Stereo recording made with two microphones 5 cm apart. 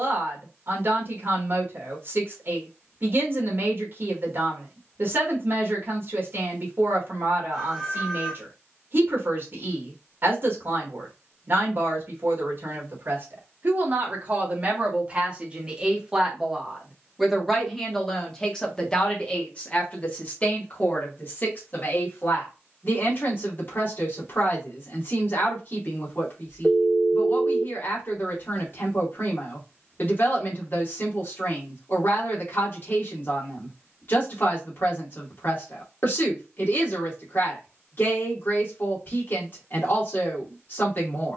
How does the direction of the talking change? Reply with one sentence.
You can hear the talking go from the right side to the left.